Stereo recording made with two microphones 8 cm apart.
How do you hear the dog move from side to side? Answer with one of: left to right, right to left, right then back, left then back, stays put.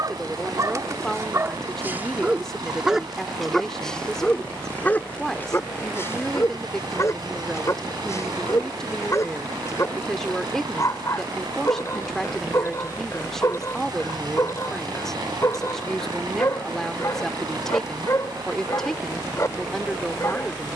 right to left.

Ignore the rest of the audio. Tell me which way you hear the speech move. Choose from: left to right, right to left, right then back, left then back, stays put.
stays put.